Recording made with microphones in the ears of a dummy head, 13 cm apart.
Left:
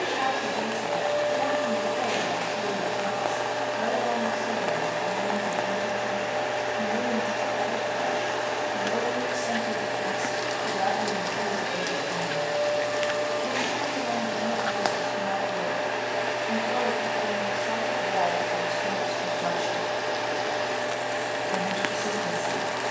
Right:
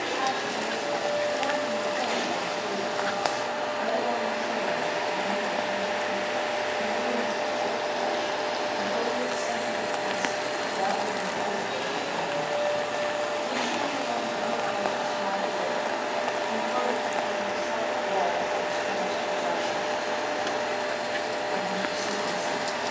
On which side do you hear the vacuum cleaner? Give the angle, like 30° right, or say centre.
70° left.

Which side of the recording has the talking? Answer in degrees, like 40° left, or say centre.
80° left.